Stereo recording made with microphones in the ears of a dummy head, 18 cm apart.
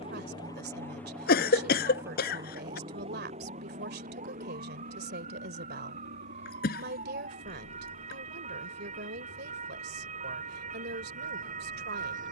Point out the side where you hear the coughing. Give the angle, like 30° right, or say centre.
50° left.